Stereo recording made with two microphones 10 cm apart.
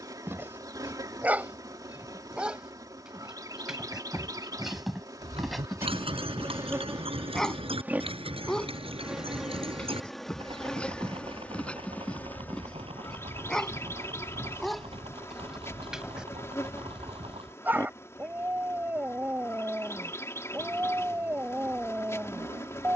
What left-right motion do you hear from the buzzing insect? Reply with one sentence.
In this clip you hear the buzzing insect move from right to left.